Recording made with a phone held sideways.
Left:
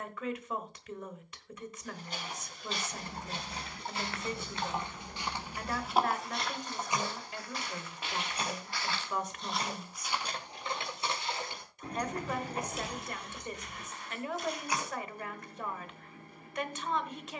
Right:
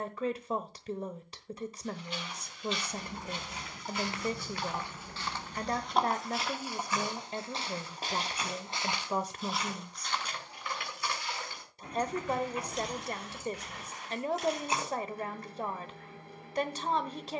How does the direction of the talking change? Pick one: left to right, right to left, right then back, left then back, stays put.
stays put.